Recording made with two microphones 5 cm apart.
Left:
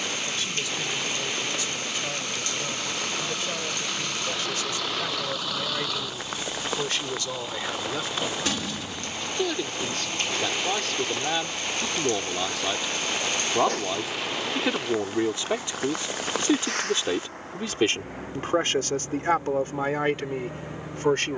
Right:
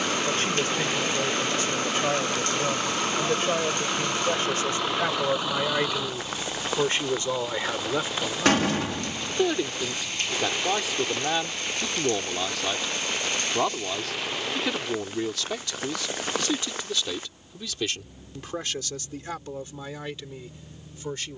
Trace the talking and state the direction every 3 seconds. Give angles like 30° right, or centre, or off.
40° right, 40° right, 30° right, 10° right, 10° left, 30° left, 50° left.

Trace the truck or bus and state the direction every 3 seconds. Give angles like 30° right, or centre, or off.
40° right, 20° right, centre, 30° left, 60° left, 70° left, 80° left.